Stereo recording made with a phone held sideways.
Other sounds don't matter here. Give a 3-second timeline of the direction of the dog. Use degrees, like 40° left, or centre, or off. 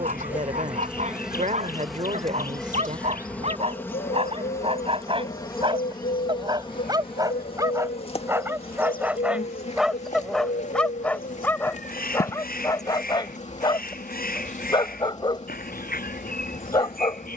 50° right, 40° right, 20° right, centre, 30° left, 30° left.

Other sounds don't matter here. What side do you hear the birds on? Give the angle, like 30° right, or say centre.
70° left.